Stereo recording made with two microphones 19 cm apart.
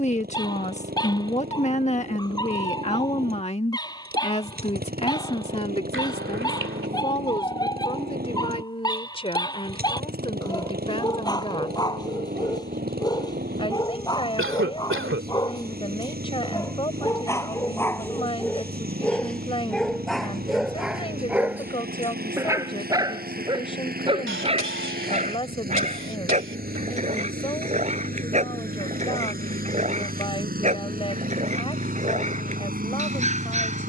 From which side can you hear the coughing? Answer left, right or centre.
right.